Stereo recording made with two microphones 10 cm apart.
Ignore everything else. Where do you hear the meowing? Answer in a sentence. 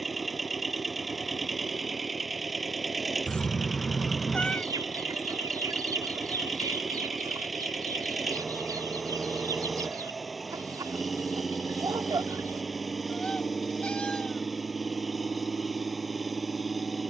You can hear the meowing in the centre.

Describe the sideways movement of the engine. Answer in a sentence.
In this clip you hear the engine stay in one place.